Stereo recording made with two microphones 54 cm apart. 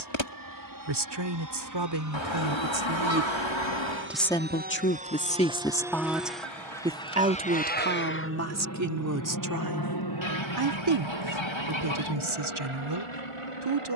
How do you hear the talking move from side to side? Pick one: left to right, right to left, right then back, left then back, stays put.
left then back.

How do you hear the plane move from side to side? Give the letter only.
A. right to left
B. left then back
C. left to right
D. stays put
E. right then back
A.